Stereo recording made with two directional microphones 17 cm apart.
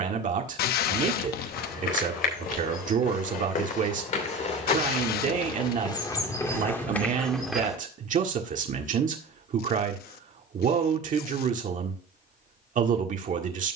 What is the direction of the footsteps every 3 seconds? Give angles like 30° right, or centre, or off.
60° left, 40° left, 10° left, off, off.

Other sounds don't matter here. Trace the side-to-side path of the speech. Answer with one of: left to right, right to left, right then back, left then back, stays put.
stays put.